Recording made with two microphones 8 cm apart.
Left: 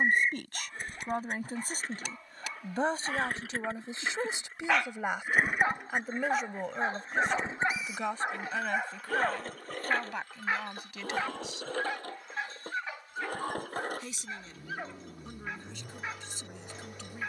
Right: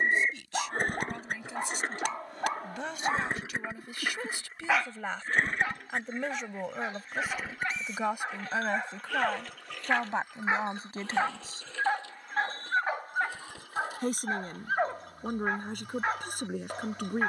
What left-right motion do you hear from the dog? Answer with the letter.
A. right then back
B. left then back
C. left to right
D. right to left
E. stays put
B.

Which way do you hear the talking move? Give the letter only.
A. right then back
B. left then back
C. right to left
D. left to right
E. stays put
D.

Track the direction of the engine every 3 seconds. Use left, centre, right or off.
right, centre, left, left, left, left.